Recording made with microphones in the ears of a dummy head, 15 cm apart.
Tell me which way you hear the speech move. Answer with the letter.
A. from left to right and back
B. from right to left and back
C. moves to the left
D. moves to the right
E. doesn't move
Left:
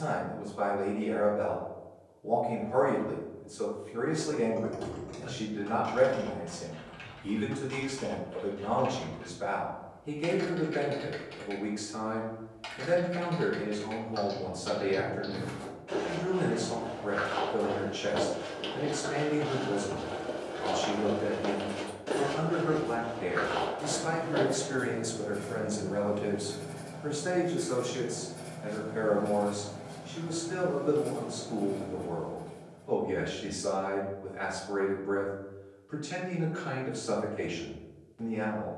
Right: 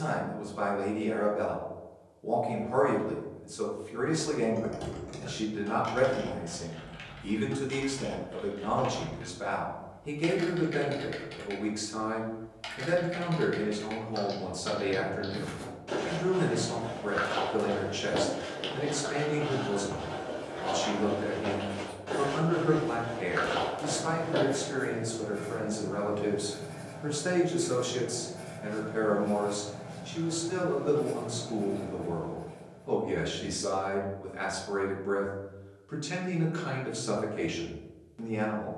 B.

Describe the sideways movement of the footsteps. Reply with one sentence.
In this clip you hear the footsteps go left and come back.